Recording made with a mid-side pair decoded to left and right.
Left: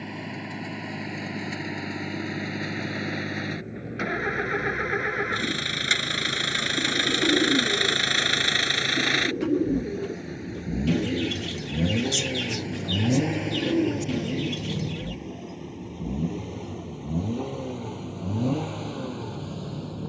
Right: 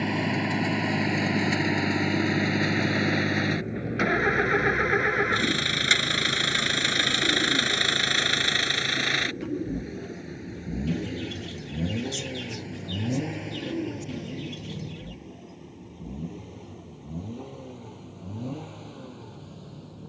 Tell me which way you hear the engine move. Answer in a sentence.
You can hear the engine move from right to left.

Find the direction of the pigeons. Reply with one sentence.
In this clip you hear the pigeons on the left.